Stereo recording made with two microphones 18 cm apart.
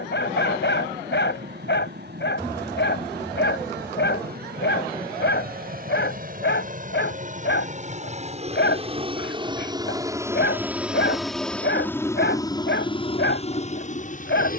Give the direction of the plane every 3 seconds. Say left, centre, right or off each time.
right, right, right, centre, left.